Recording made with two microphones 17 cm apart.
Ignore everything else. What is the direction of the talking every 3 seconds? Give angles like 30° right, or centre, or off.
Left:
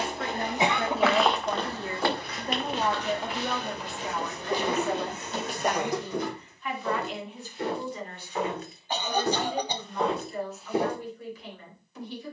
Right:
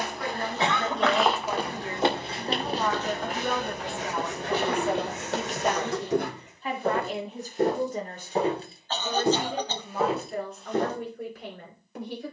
30° left, 10° right, 40° right, 50° right.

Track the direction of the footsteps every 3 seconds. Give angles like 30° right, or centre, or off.
10° right, 60° right, 40° right, 10° right.